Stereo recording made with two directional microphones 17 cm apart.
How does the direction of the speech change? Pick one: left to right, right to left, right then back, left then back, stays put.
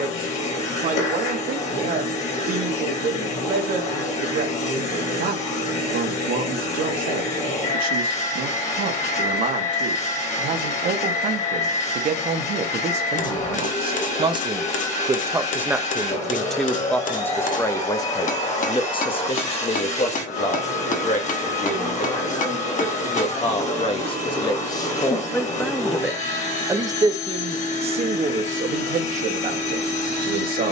left then back.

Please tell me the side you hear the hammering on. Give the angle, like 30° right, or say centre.
60° left.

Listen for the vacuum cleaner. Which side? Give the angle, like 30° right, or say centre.
50° left.